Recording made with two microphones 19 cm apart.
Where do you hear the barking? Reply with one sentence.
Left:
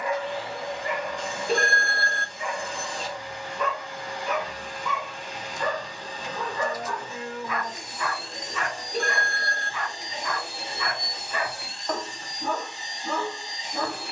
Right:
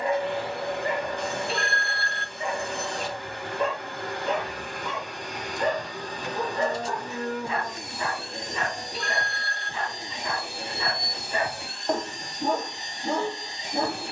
You can hear the barking on the right.